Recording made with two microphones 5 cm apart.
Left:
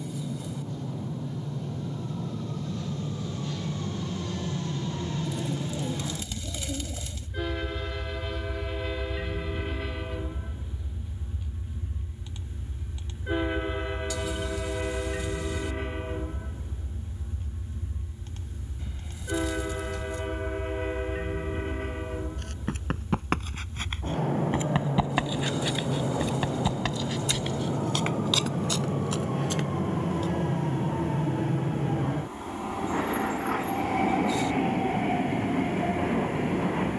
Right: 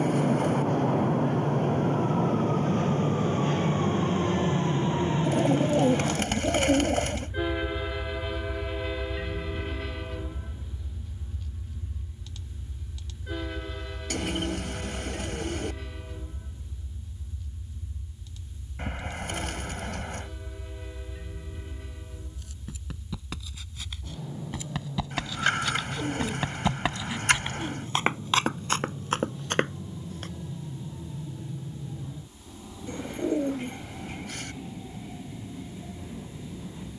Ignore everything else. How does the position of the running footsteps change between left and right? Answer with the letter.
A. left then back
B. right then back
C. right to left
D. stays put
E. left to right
E.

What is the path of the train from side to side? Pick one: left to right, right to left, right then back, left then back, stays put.
right to left.